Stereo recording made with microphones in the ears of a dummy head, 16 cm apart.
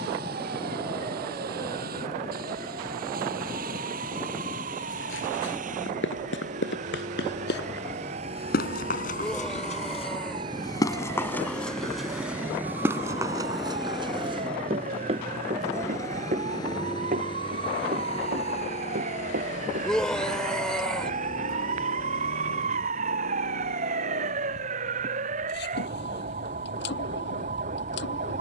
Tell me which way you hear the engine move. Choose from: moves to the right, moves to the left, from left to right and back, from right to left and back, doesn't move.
moves to the left.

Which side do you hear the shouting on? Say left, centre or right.
centre.